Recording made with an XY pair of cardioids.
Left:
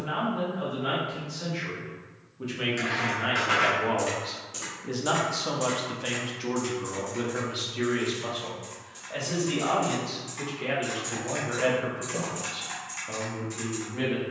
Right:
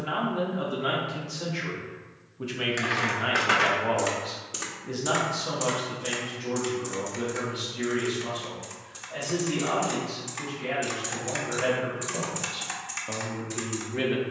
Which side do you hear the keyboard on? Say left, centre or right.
right.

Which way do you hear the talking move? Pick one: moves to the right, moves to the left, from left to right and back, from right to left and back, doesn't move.
from right to left and back.